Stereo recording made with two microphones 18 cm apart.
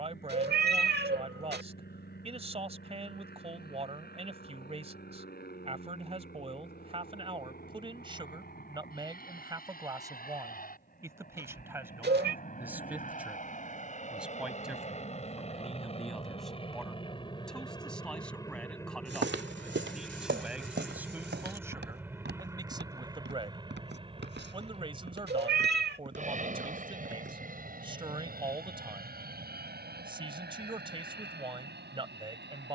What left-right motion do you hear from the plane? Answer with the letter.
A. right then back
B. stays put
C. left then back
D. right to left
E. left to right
E.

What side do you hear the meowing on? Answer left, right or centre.
right.